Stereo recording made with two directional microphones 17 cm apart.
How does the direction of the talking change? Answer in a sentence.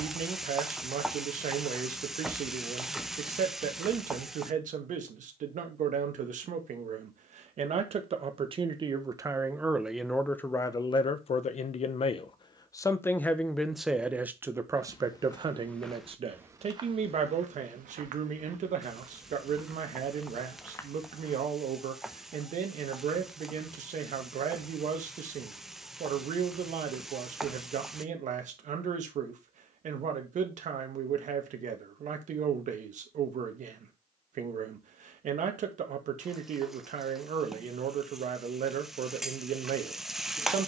You can hear the talking go left and come back.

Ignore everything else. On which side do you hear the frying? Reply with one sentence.
In this clip you hear the frying in the centre.